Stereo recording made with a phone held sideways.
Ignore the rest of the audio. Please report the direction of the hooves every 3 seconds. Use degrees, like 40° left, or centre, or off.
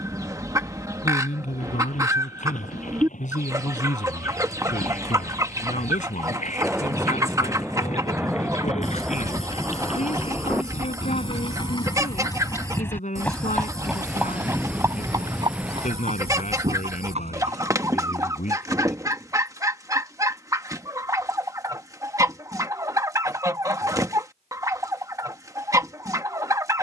70° left, 70° left, 60° left, 50° left, centre, 50° right, off, off, off.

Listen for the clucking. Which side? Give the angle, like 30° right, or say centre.
20° right.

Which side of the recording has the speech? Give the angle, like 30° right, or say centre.
70° left.